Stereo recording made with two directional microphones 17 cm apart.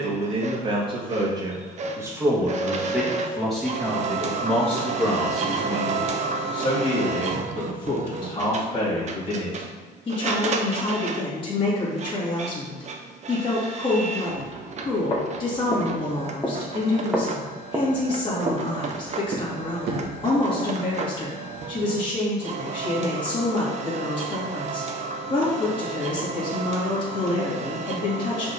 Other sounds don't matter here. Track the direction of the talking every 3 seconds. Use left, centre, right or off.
right, centre, left, left, left, left, left, left, left, left.